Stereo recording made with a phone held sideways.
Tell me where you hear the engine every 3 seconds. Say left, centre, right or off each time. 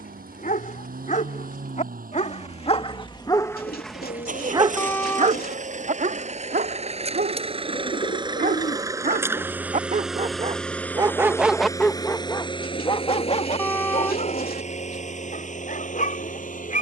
right, right, right, centre, left, left.